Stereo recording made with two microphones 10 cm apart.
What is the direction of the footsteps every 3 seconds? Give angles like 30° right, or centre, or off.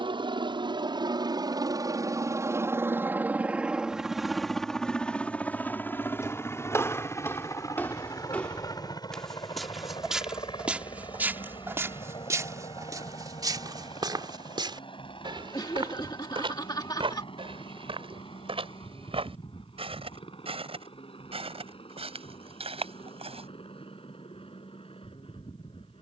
off, off, 20° left, 10° right, 40° right, 60° right, 70° right, 80° right, off.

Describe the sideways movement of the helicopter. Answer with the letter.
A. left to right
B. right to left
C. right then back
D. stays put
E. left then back
B.